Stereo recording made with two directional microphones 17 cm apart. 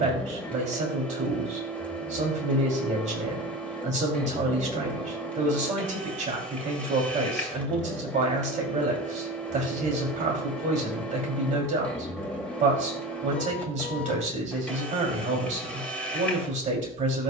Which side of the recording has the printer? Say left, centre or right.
centre.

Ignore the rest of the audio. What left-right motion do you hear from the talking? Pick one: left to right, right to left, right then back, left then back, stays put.
stays put.